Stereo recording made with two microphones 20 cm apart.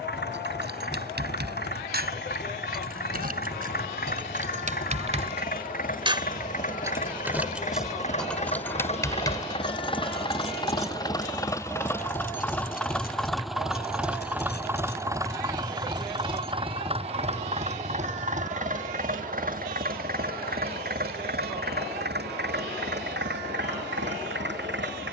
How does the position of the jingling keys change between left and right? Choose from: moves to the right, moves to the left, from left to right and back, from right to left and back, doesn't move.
moves to the left.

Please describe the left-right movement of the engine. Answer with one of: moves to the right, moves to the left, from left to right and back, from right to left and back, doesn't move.
moves to the right.